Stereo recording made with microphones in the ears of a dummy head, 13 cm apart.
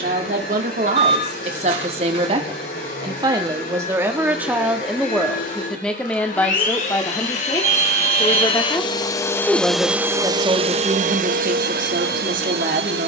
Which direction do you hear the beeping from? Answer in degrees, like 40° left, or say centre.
50° right.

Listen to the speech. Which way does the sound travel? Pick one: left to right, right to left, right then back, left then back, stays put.
left then back.